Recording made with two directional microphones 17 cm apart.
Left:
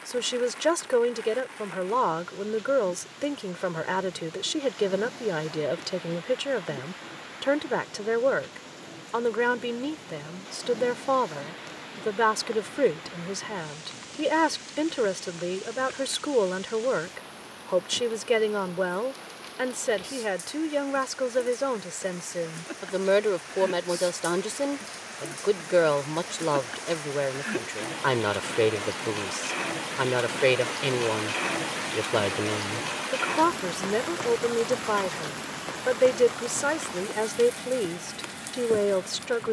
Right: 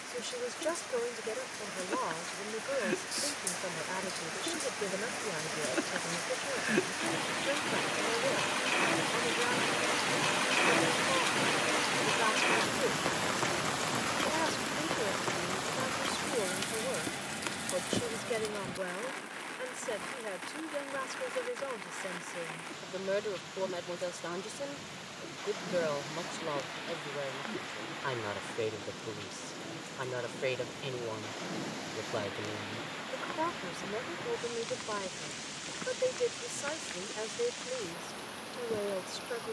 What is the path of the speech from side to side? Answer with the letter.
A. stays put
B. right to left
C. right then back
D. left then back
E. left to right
A.